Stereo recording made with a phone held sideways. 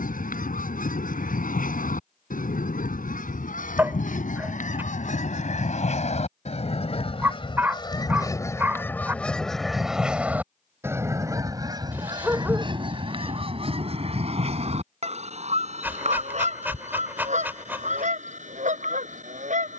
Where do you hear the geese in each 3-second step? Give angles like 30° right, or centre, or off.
70° left, 70° left, 30° left, 10° right, 40° right, 50° right, 60° right.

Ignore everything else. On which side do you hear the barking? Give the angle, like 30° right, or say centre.
10° right.